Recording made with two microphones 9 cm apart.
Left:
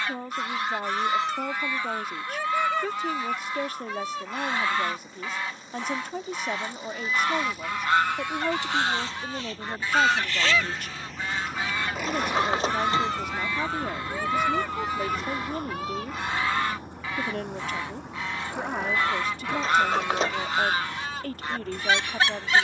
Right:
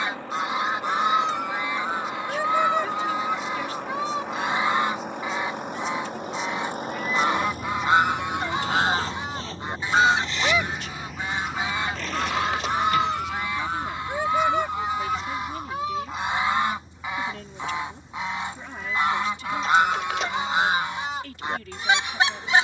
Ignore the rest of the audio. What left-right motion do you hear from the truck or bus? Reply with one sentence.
In this clip you hear the truck or bus travel towards the left.